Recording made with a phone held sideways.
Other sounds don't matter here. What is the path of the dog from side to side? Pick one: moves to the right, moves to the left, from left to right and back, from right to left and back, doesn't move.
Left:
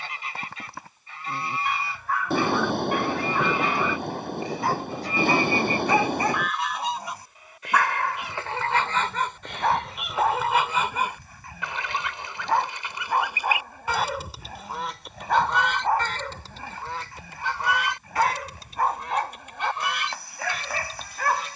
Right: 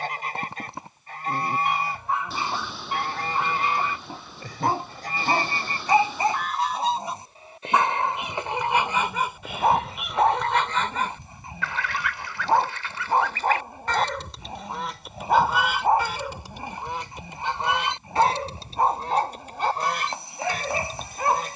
doesn't move.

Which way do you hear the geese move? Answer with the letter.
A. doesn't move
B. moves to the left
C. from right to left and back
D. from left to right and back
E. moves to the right
C.